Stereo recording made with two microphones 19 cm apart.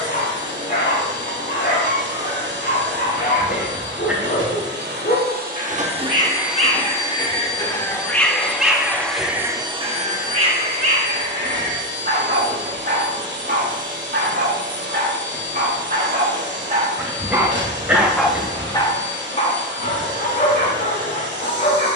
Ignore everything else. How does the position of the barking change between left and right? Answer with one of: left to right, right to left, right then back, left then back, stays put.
right then back.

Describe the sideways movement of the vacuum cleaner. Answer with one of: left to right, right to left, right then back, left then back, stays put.
left then back.